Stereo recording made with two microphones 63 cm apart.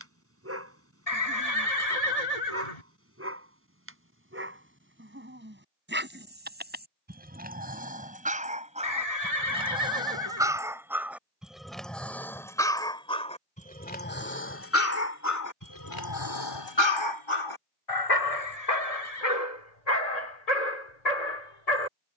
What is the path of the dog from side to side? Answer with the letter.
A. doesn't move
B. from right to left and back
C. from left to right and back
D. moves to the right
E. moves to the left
E.